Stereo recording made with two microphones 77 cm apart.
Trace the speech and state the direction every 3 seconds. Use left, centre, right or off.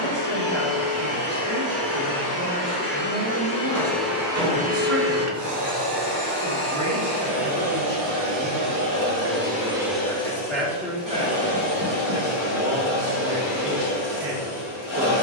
right, right, centre, centre, right.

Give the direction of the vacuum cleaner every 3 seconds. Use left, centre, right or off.
left, centre, right, centre, left.